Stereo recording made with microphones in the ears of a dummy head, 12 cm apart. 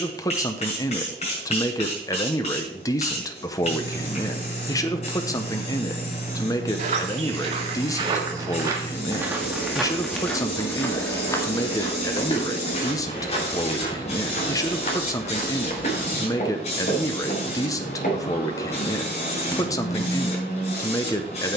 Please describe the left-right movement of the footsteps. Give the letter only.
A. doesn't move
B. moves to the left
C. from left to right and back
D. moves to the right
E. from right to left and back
B.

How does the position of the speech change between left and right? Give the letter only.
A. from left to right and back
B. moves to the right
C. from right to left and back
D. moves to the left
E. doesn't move
E.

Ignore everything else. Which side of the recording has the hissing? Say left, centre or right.
left.